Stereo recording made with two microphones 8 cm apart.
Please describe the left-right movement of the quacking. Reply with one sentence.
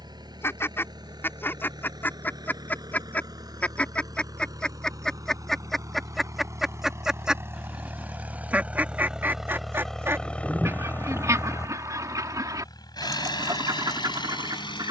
In this clip you hear the quacking travel towards the right.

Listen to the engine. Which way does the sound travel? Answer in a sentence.
You can hear the engine go from the right side to the left.